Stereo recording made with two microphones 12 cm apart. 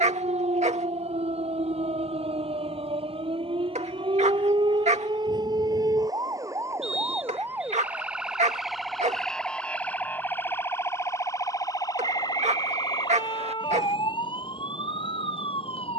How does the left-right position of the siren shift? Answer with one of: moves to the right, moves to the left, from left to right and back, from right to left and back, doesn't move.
moves to the left.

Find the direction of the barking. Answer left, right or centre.
right.